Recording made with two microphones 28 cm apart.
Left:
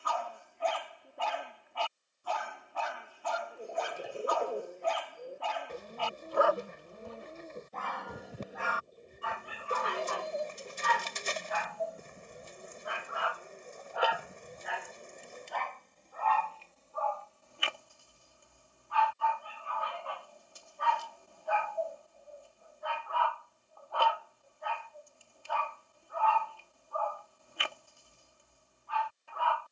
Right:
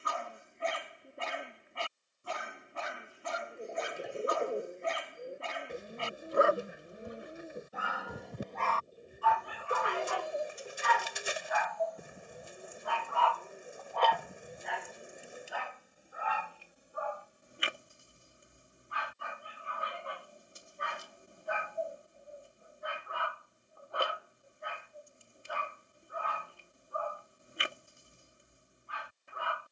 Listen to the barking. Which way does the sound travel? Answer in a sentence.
In this clip you hear the barking go left and come back.